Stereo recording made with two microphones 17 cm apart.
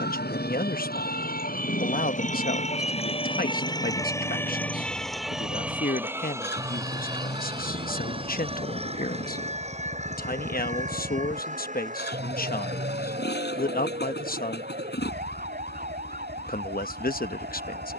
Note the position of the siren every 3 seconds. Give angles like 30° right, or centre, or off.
50° left, 10° left, 20° right, 40° right, 50° right, 50° right.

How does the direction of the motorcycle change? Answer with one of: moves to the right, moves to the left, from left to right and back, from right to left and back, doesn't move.
doesn't move.